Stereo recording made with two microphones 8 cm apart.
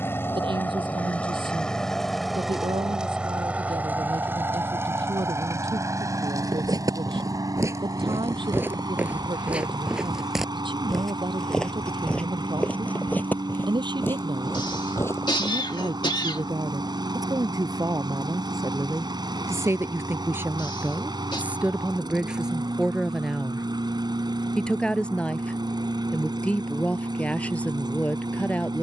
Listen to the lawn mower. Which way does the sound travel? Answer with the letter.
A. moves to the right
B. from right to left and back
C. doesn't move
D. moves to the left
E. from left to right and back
A.